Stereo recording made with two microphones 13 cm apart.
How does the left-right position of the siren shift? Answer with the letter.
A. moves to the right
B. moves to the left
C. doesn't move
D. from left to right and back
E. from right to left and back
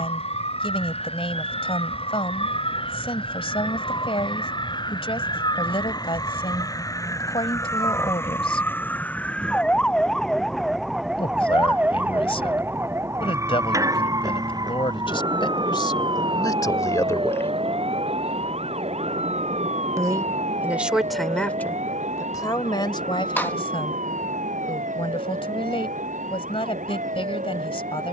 A.